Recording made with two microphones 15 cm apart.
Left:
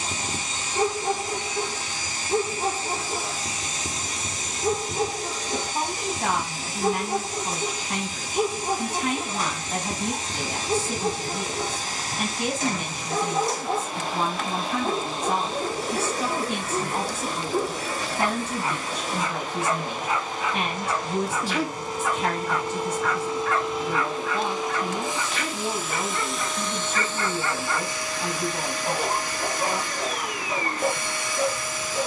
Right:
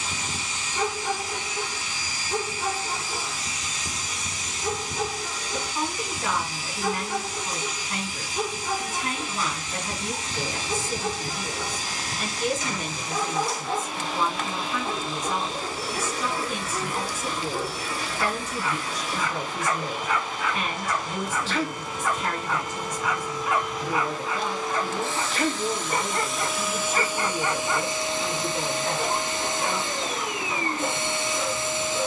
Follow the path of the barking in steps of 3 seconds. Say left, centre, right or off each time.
left, left, left, left, left, left, left, centre, right, centre, left.